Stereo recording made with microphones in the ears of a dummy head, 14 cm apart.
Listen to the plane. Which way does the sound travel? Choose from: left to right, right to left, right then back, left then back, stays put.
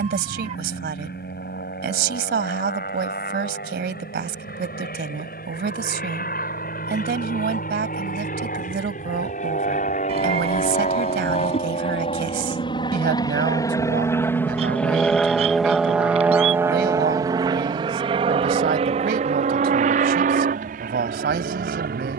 left to right.